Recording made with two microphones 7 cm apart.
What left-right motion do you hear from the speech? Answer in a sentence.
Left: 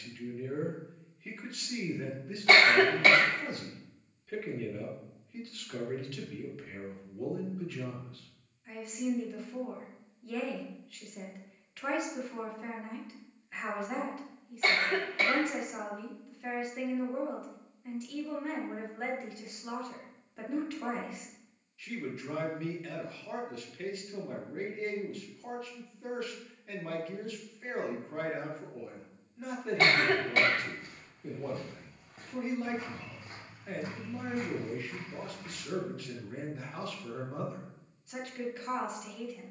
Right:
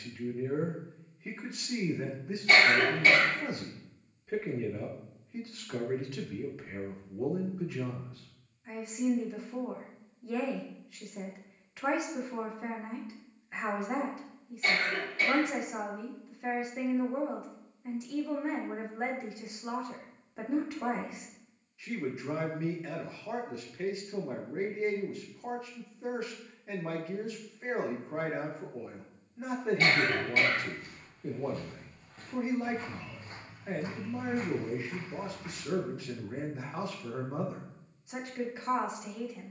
You can hear the speech stay put.